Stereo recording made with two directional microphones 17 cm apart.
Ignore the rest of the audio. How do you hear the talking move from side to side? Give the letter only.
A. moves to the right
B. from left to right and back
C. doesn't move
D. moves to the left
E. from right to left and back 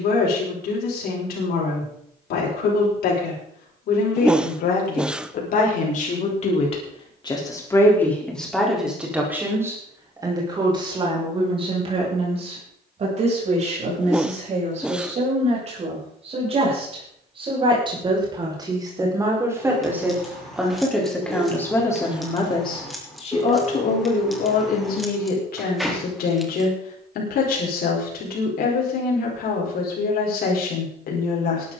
B.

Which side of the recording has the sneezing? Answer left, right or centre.
centre.